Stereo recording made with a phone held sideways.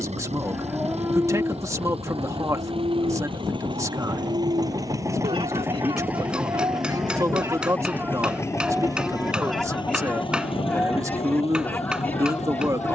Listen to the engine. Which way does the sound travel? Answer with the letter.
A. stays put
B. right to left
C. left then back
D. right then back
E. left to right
B.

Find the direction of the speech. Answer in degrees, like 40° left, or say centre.
20° right.